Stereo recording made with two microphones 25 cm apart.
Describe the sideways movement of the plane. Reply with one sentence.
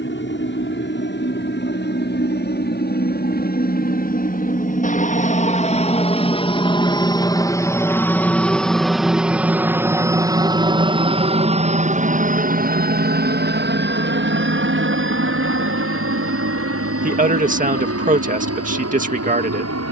You can hear the plane go from the left side to the right.